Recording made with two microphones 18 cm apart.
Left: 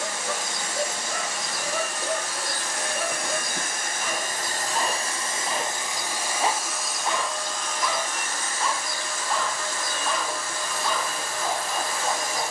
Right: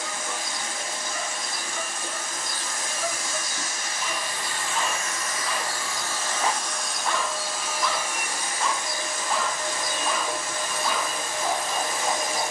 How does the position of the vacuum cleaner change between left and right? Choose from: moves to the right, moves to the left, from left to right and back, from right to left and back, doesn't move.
moves to the right.